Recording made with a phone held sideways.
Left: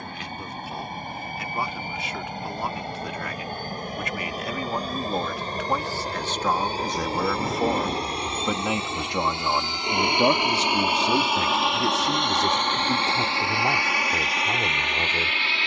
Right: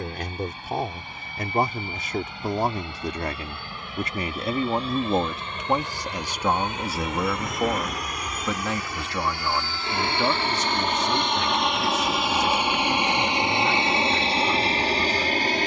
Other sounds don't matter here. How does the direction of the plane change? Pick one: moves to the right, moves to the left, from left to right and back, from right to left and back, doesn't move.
moves to the right.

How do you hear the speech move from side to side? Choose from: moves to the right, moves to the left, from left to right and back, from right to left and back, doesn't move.
moves to the left.